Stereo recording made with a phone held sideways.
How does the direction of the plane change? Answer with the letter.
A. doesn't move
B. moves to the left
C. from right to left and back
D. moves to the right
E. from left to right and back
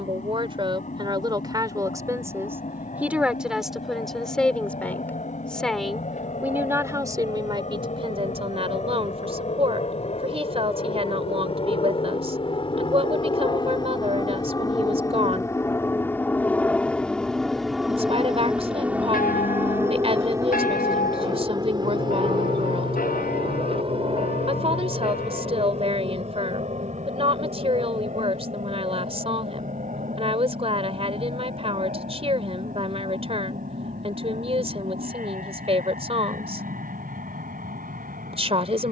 D.